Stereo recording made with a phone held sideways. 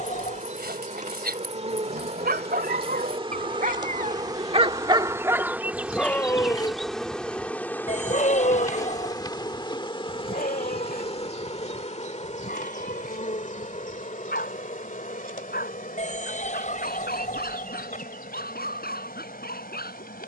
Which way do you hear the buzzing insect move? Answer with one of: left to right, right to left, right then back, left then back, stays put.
right to left.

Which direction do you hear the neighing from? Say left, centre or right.
left.